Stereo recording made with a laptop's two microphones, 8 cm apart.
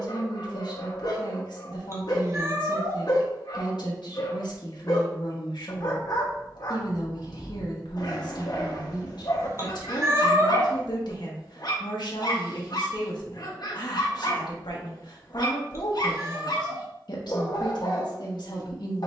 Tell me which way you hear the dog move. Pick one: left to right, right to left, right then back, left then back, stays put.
stays put.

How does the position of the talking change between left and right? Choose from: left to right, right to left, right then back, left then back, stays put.
stays put.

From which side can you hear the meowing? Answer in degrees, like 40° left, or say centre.
40° right.